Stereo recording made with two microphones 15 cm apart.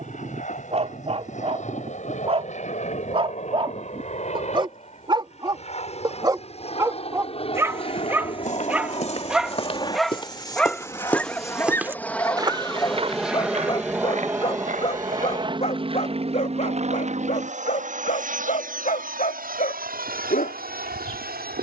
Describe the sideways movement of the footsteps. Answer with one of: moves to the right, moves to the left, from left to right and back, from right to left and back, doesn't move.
moves to the right.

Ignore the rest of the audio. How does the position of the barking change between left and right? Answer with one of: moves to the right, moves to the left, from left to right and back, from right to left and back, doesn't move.
moves to the left.